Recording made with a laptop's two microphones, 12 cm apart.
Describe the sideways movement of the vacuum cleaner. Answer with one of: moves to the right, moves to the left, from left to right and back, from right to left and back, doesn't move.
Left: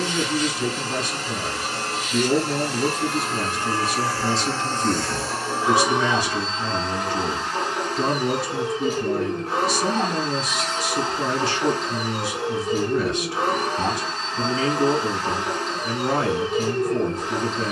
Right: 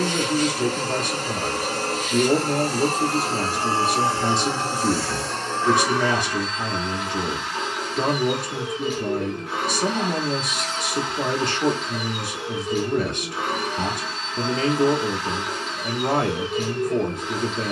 moves to the left.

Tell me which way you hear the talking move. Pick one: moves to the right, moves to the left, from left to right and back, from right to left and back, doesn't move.
doesn't move.